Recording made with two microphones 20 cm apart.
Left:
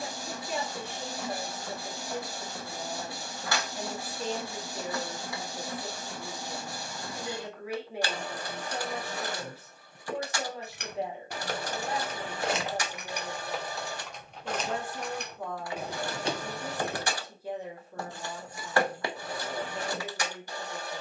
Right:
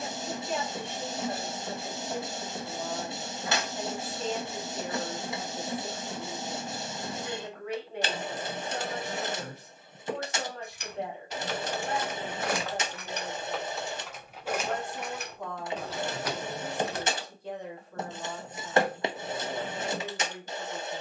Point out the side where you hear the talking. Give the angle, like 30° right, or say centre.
10° left.